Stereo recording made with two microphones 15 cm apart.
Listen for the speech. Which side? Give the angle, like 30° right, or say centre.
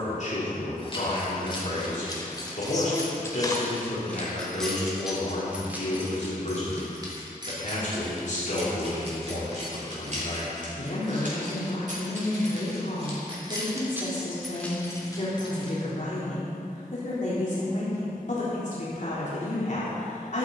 60° left.